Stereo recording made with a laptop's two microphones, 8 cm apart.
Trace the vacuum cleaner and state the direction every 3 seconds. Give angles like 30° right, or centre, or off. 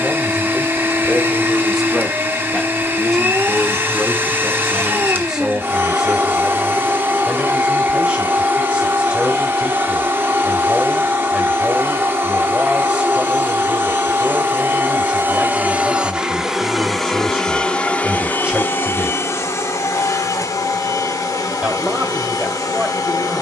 30° right, 30° right, 30° right, 30° right, 30° right, 10° right, 40° left, 50° left.